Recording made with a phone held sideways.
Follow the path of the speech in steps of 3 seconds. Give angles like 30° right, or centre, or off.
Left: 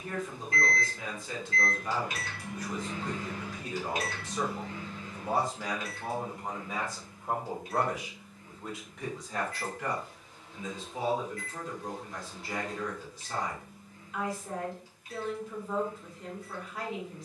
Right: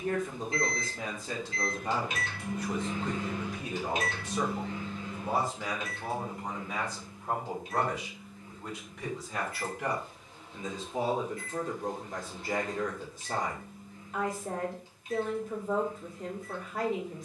40° right, 10° right, centre, 30° right, 50° right, 50° right.